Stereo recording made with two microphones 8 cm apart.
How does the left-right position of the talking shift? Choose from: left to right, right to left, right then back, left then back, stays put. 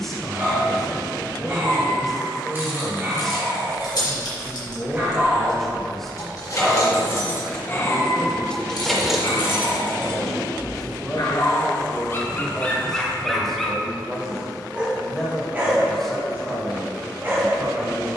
stays put.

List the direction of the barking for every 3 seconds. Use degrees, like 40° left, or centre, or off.
30° right, 30° right, 20° left, 60° left, 10° left, 30° right.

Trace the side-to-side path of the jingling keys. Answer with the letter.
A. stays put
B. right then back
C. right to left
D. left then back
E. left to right
E.